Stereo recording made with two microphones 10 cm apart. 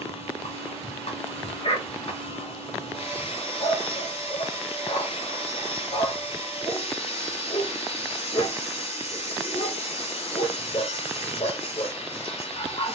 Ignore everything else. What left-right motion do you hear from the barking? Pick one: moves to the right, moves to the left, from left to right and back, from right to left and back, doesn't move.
doesn't move.